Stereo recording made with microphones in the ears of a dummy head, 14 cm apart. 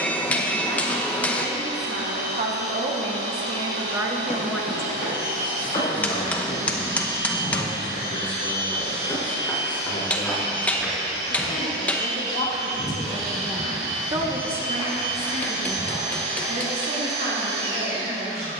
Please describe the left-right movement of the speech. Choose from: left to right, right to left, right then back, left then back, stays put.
left then back.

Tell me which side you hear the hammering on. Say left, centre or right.
centre.